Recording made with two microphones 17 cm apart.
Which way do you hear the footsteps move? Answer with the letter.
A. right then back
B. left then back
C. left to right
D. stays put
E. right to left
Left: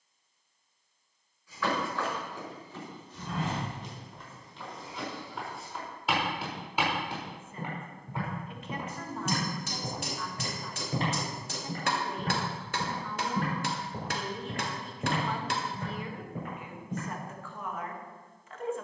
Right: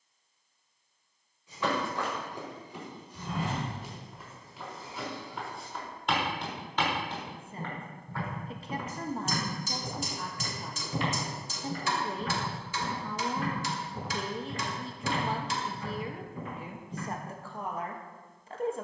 E.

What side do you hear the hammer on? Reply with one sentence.
You can hear the hammer on the left.